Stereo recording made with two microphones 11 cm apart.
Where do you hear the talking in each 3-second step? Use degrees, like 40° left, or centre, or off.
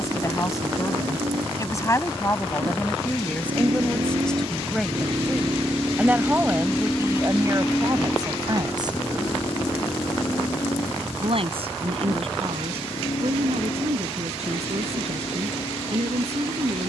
30° left, 10° left, 30° right, 60° right, 60° right, 70° right.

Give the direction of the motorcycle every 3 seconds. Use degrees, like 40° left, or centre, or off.
70° right, 40° right, 10° left, 40° left, 60° left, 60° left.